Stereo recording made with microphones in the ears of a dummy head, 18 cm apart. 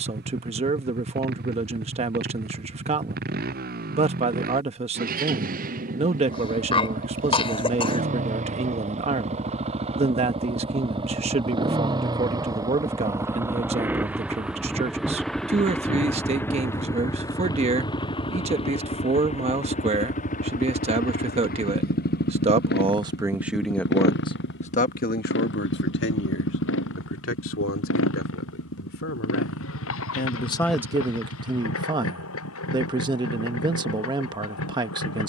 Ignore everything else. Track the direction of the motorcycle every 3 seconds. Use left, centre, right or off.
right, right, right, right, centre, centre, left, left, left, left, left, left.